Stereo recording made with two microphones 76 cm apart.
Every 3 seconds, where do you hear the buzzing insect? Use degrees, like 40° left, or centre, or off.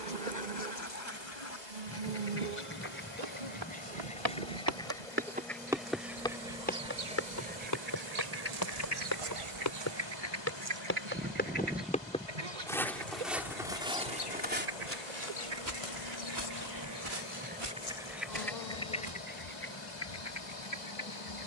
80° right, 80° right, 60° right, 20° right, 30° left, 40° left, 60° left.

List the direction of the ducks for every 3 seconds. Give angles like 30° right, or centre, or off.
20° left, 10° left, 10° right, 30° right, 50° right, 30° right, 10° left.